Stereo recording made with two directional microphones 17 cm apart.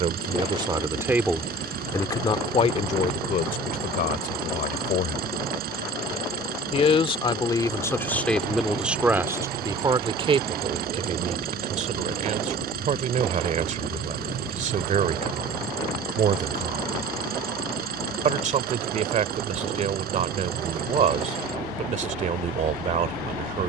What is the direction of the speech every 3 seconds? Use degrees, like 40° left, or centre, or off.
centre, 60° left, 20° left, 30° right, 50° right, 50° right, 50° right, 50° right.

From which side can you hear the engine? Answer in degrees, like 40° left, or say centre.
60° right.